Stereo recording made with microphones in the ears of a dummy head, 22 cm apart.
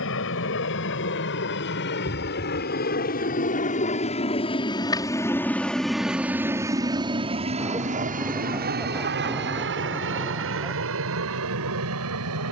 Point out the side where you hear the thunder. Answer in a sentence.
You can hear the thunder in the centre.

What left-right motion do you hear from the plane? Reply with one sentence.
You can hear the plane go from the left side to the right.